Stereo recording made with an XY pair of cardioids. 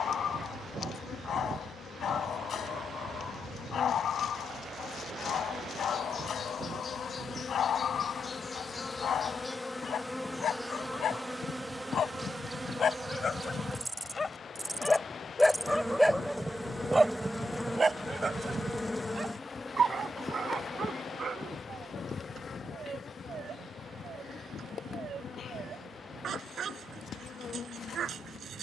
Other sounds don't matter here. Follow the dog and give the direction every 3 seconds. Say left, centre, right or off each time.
left, left, left, left, left, centre, right, right, right, right.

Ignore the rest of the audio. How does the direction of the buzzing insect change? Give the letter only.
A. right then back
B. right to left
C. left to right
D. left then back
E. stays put
A.